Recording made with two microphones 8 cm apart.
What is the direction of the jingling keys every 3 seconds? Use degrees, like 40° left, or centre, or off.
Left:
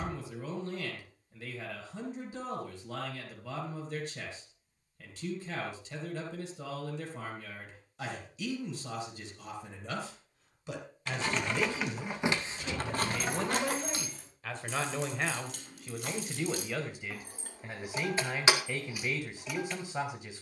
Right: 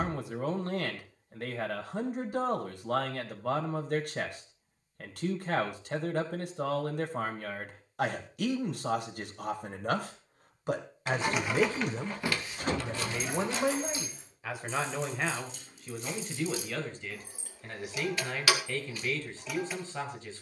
off, off, off, 10° right, 50° left, 60° left, 20° left.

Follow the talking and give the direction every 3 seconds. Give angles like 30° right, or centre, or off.
60° right, 60° right, 60° right, 50° right, 20° right, 10° left, 10° left.